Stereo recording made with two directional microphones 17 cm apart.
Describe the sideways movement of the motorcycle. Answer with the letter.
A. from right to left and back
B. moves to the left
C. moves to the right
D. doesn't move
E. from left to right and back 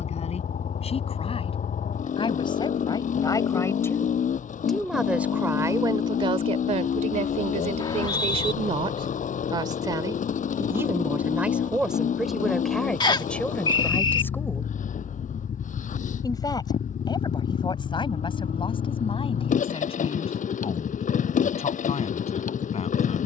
D.